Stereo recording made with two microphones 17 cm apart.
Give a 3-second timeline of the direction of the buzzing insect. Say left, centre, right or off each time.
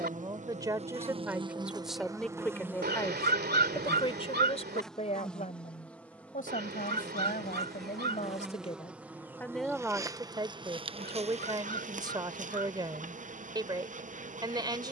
right, centre, centre, right, right.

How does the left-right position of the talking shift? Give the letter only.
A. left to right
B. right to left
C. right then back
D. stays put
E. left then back
E.